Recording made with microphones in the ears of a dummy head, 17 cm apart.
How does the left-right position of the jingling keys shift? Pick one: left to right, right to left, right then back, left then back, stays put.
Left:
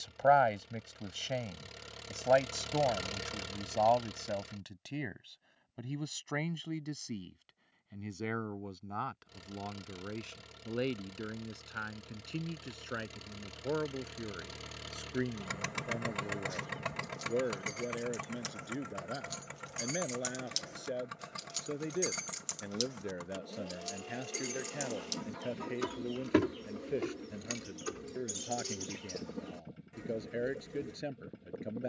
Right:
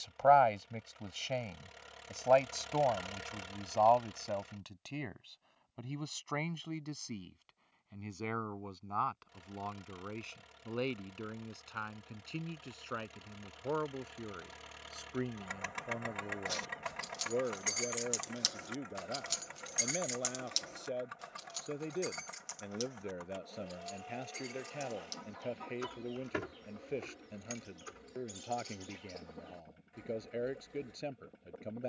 right to left.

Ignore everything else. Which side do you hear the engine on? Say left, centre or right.
left.